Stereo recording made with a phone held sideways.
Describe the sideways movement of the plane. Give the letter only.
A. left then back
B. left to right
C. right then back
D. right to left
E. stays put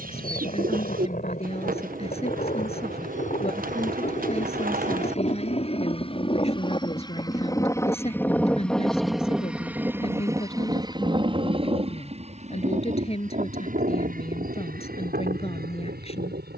B.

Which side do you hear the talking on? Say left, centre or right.
left.